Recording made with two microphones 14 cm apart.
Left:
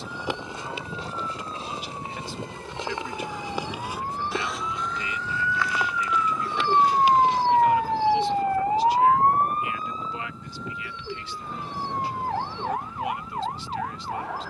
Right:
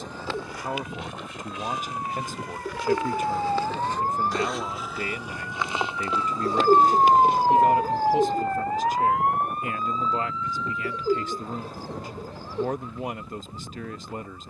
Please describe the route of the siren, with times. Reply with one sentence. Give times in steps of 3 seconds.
You can hear the siren on the right from 0 s, in the centre from 6 s and on the left from 9 s.